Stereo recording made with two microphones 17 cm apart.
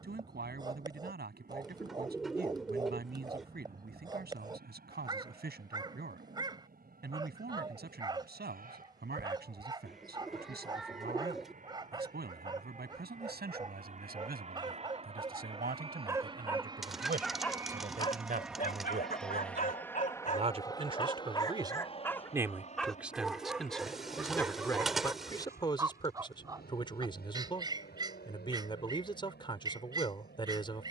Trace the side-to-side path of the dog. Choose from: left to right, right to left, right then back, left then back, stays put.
left then back.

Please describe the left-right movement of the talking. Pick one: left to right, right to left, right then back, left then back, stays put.
right to left.